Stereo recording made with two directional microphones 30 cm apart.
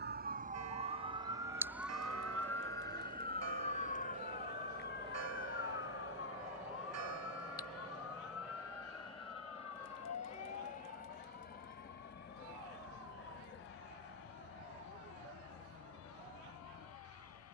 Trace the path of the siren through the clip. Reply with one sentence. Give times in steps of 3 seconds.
In this clip you hear the siren in the centre from 0 s and on the left from 3 s.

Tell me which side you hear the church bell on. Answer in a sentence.
You can hear the church bell on the right.